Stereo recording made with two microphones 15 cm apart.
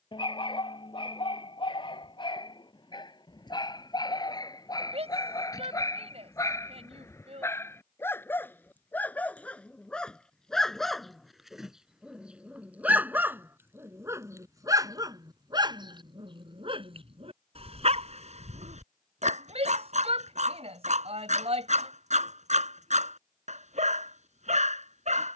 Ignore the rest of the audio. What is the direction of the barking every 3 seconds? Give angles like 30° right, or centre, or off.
30° left, 30° left, 20° left, 10° left, 10° right, 30° right, 50° right, 50° right, 50° right.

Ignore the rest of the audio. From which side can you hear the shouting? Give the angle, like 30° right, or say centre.
40° right.